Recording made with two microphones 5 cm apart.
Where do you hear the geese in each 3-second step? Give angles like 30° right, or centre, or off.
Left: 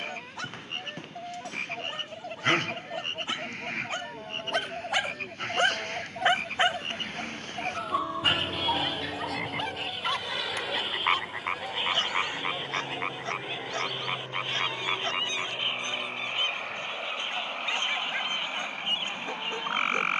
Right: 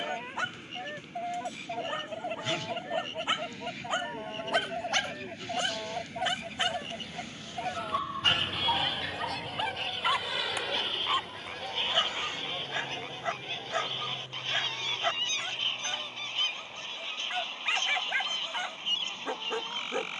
20° right, 10° right, centre, centre, 10° left, 10° left, 20° left.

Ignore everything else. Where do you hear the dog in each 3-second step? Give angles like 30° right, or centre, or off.
20° right, centre, 10° left, 10° right, 20° right, 20° right, 20° right.